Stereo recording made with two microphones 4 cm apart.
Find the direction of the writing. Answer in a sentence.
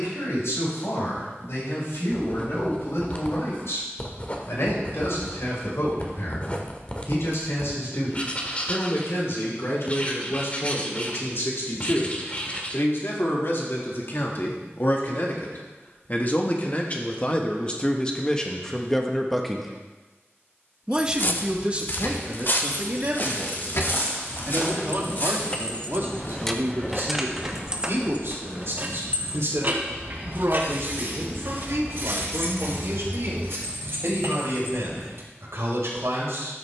In this clip you hear the writing on the left.